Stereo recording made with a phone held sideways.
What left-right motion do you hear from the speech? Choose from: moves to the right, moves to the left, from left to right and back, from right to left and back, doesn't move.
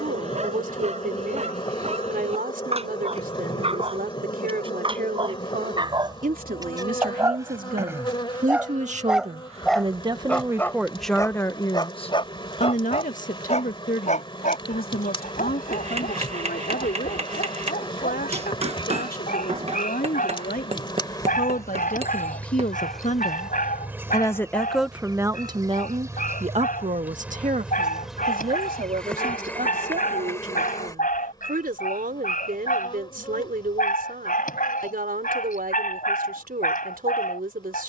from right to left and back.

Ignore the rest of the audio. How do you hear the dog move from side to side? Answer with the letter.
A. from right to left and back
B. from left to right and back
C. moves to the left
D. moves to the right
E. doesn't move
C.